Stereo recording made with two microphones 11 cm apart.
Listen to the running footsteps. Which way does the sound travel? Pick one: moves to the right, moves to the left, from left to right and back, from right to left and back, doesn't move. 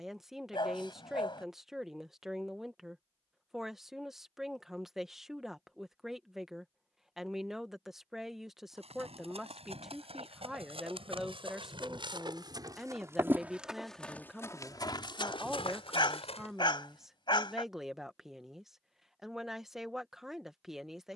moves to the left.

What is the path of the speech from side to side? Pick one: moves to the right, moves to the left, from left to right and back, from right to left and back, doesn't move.
doesn't move.